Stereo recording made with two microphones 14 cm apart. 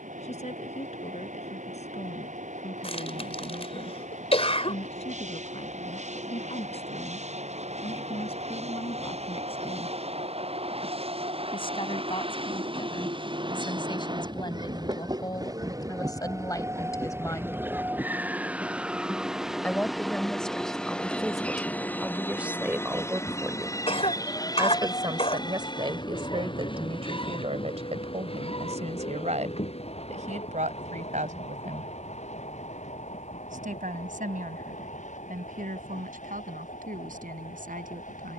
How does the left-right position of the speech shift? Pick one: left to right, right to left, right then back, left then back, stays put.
left to right.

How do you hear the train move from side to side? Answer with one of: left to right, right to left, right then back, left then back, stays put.
right to left.